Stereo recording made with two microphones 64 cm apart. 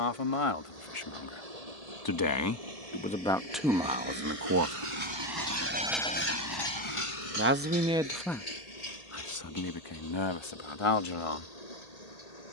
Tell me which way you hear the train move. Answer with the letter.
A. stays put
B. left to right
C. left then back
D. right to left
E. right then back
D.